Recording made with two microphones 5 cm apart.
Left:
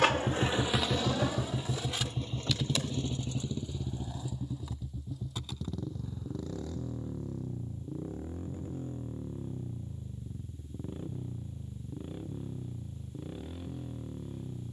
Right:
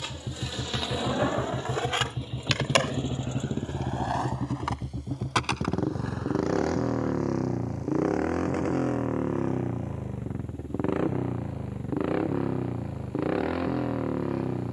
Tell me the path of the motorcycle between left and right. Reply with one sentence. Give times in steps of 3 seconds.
You can hear the motorcycle in the centre from 0 s and on the right from 3 s.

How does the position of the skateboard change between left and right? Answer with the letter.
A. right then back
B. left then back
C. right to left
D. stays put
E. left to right
E.